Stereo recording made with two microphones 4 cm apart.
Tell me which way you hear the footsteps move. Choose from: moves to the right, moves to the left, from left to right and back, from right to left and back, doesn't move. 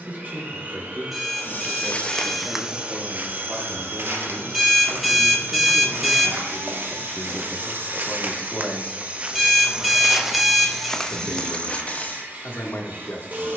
from left to right and back.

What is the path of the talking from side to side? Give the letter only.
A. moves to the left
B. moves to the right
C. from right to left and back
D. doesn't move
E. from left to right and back
A.